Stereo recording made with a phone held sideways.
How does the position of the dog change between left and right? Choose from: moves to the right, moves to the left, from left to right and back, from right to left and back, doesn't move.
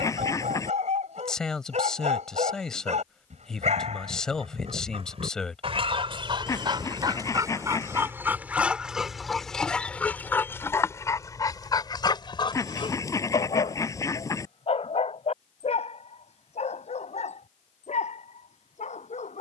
moves to the left.